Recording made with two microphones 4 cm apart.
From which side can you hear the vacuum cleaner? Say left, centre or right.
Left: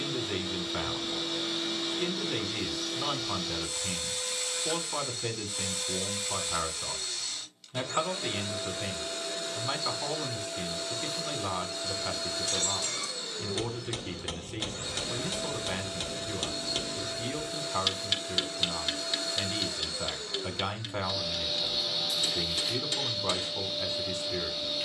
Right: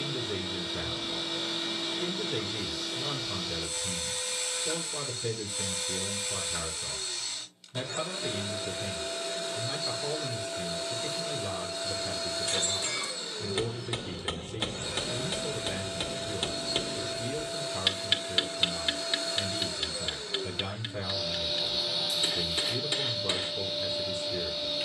centre.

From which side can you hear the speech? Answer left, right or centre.
left.